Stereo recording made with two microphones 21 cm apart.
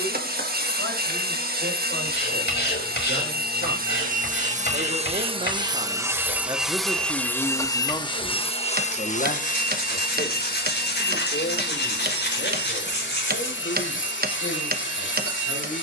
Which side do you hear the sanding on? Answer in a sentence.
You can hear the sanding on the left.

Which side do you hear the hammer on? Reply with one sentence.
In this clip you hear the hammer on the right.